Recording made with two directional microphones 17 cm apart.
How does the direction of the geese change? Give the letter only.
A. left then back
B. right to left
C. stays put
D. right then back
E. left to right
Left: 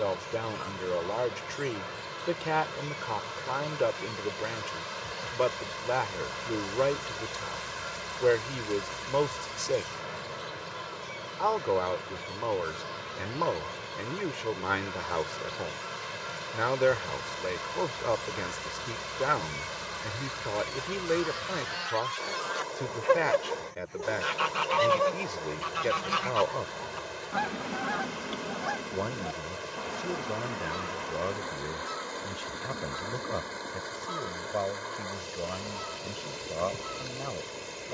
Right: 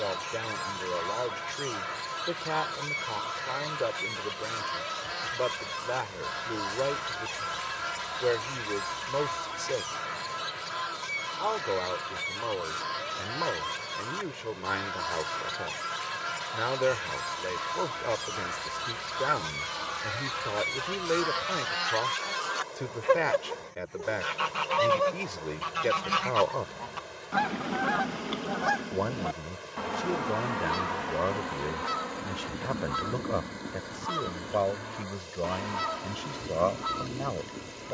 A.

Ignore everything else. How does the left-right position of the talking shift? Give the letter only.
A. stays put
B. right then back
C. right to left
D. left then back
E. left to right
E.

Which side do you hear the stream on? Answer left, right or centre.
left.